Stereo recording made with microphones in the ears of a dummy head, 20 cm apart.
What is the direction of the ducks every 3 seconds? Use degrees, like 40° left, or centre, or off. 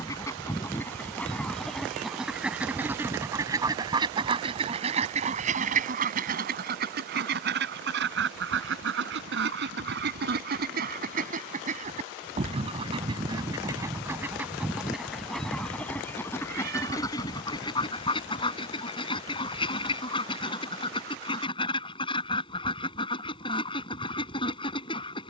centre, 30° right, 50° right, 50° right, 20° right, 10° left, 20° left, 20° left, 20° left.